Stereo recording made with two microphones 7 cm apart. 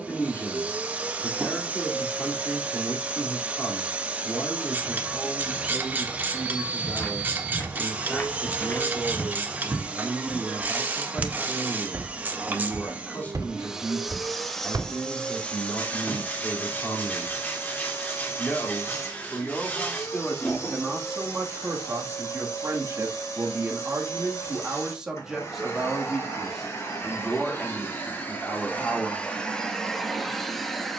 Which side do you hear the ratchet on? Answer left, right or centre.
right.